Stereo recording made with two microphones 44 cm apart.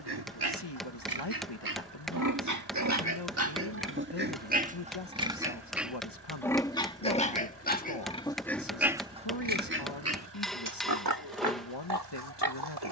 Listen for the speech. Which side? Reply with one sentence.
You can hear the speech on the left.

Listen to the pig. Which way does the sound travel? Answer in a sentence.
You can hear the pig move from right to left and back again.